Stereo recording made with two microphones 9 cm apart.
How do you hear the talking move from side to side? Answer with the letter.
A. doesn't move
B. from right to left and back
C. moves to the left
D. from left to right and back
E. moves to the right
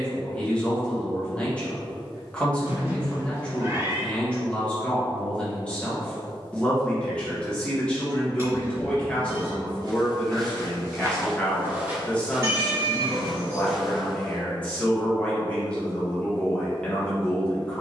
A.